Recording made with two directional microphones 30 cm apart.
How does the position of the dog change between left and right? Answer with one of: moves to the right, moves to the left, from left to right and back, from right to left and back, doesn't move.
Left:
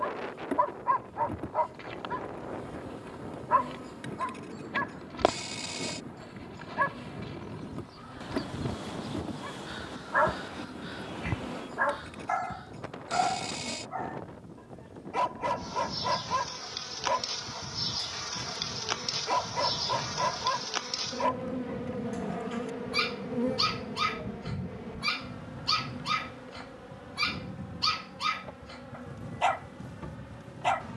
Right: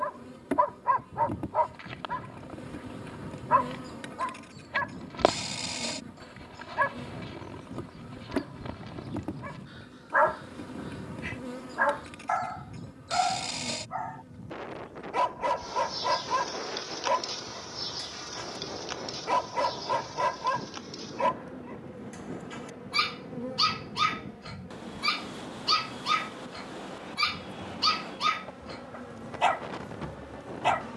doesn't move.